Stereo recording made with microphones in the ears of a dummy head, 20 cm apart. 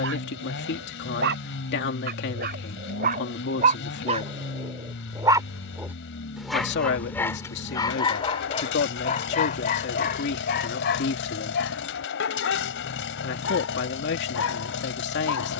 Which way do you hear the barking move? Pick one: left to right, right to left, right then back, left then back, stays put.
right to left.